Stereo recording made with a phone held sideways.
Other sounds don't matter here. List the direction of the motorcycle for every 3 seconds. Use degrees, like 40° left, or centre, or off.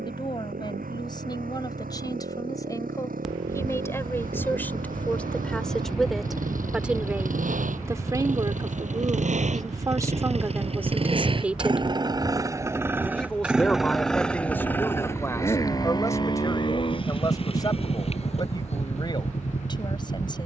80° right, 80° right, 70° right, 50° right, 10° right, 30° left, 50° left.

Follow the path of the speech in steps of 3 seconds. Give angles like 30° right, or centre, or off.
30° left, 10° left, 20° right, 20° right, 10° left, 20° left, 30° left.